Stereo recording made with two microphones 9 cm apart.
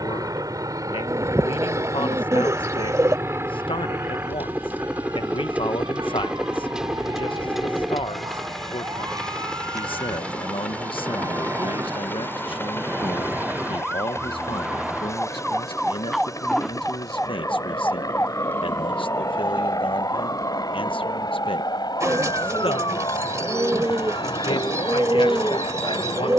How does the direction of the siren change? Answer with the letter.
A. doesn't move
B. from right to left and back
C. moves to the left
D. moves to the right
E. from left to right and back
C.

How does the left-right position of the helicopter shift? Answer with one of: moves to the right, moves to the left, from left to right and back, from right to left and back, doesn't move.
moves to the left.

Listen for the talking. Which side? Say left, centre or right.
left.